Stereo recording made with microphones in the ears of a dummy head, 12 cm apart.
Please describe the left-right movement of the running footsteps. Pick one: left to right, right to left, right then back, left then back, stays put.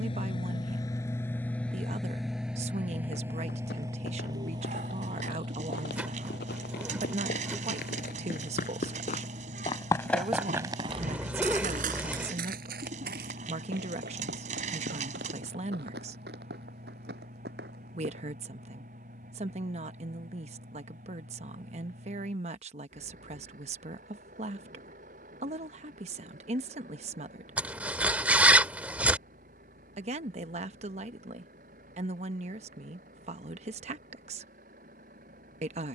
left to right.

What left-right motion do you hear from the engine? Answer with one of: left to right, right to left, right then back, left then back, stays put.
left to right.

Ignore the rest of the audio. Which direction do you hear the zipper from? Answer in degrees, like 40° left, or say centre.
10° right.